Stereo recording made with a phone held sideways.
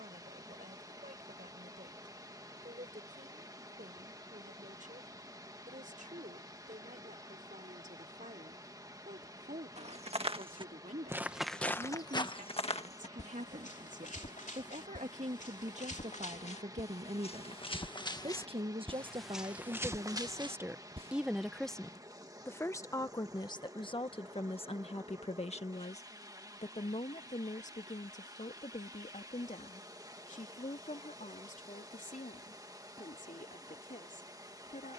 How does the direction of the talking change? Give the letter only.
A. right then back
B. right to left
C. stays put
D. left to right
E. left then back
B.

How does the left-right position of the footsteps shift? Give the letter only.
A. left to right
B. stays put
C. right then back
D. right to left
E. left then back
E.